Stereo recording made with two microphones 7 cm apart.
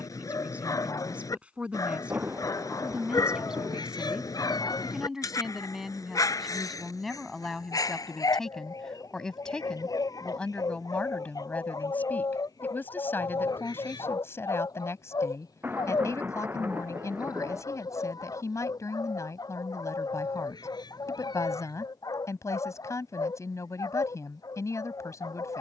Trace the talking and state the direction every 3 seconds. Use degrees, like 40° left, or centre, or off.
20° right, 10° right, centre, 20° left, 30° left, 40° left, 50° left, 50° left, 50° left.